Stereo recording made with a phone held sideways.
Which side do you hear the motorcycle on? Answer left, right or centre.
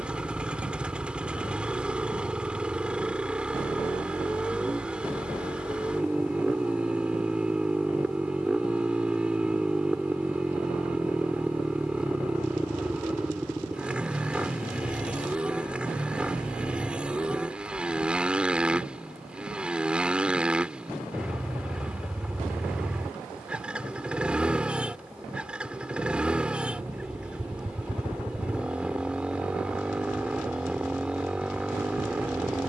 centre.